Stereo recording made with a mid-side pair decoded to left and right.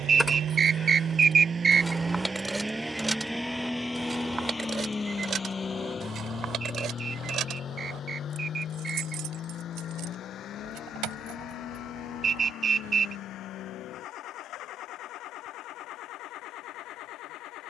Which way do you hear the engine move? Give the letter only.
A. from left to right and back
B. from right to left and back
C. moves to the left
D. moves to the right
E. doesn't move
C.